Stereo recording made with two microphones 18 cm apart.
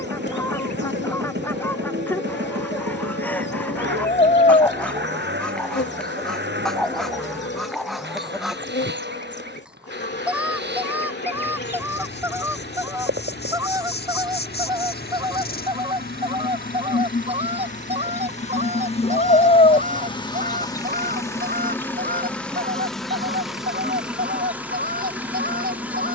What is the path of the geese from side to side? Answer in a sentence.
In this clip you hear the geese move from left to right.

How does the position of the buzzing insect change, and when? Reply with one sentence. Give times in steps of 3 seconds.
In this clip you hear the buzzing insect on the left from 0 s and in the centre from 21 s.